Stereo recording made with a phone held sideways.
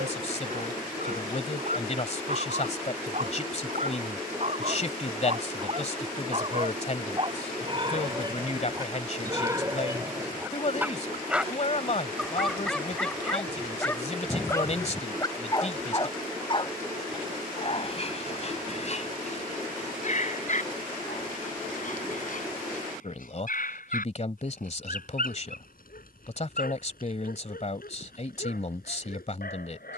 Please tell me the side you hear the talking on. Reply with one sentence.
In this clip you hear the talking on the left.